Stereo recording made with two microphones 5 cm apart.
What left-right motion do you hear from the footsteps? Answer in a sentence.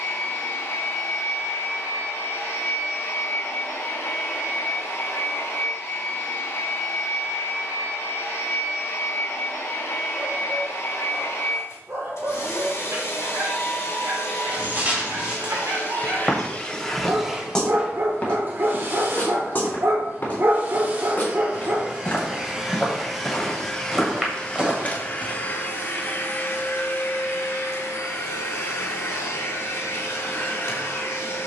In this clip you hear the footsteps go left and come back.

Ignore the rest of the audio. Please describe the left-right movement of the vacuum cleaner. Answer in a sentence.
In this clip you hear the vacuum cleaner move from left to right and back again.